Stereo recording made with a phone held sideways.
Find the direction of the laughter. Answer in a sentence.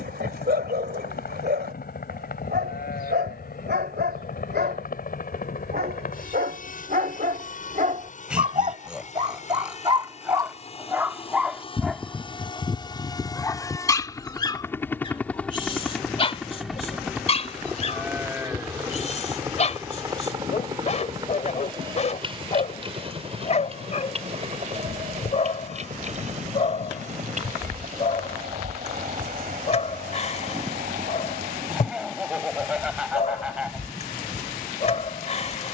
In this clip you hear the laughter in the centre.